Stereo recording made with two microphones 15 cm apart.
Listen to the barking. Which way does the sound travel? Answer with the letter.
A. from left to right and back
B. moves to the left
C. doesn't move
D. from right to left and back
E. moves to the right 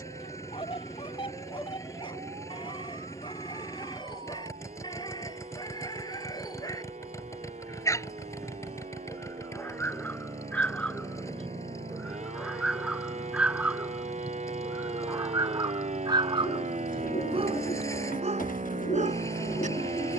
E.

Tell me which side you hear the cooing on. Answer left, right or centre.
left.